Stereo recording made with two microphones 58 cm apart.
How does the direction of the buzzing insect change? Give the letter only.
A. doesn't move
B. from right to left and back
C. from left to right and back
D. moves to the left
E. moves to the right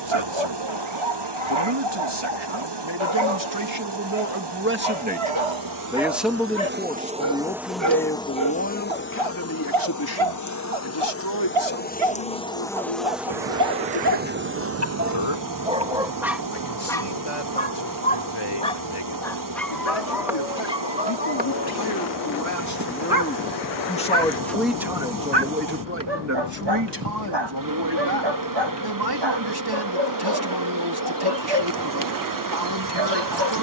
B.